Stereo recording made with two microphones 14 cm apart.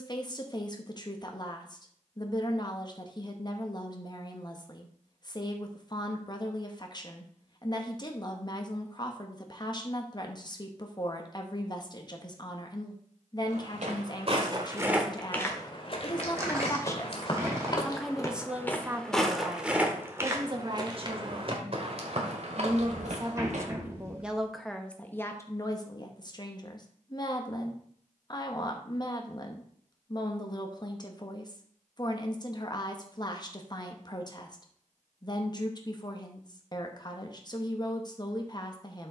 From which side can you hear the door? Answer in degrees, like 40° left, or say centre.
20° right.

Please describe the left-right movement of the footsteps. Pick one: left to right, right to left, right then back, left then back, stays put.
left then back.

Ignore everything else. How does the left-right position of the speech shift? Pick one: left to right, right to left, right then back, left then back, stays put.
right then back.